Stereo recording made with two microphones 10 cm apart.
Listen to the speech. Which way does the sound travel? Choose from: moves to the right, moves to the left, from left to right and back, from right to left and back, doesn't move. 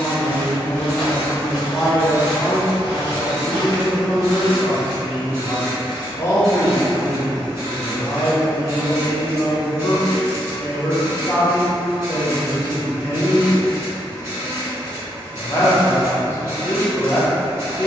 doesn't move.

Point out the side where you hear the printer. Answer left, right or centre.
right.